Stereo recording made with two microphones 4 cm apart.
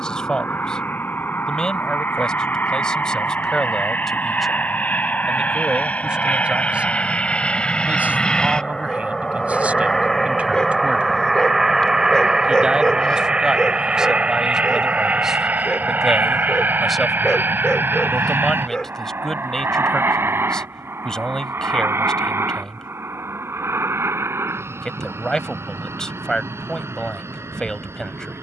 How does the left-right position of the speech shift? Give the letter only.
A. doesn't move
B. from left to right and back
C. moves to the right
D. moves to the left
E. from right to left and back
B.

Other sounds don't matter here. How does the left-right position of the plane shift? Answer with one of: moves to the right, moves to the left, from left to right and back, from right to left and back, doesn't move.
moves to the right.